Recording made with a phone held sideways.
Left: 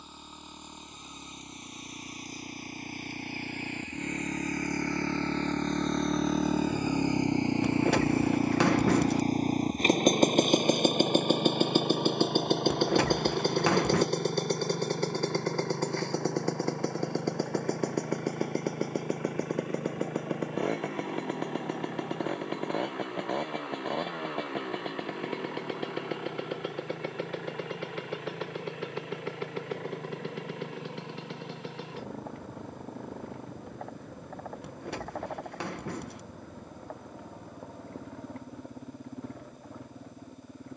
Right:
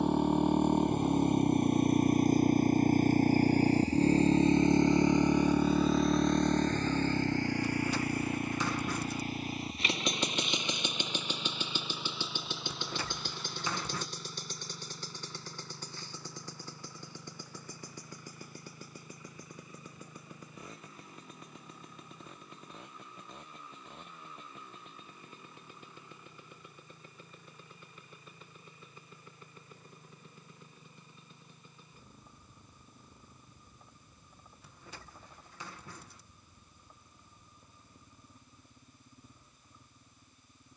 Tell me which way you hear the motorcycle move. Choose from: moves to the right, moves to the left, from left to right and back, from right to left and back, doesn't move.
moves to the left.